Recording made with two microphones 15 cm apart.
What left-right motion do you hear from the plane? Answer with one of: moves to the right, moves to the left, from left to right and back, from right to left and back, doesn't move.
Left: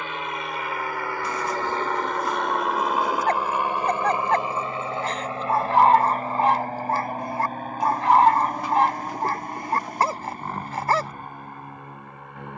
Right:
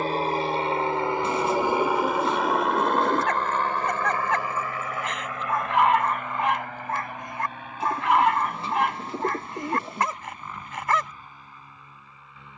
moves to the left.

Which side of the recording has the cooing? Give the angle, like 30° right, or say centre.
30° right.